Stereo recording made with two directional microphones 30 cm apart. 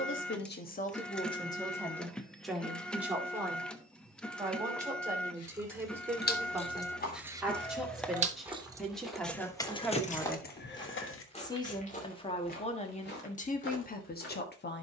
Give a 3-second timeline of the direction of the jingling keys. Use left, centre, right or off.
off, left, centre, left, off.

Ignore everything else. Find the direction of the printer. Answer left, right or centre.
centre.